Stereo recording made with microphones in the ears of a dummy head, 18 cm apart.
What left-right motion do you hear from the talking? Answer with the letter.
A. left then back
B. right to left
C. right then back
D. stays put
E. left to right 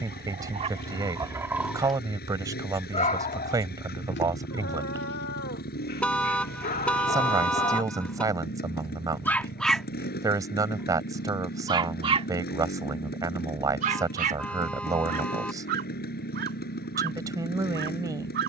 D.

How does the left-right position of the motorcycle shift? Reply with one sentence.
In this clip you hear the motorcycle stay put.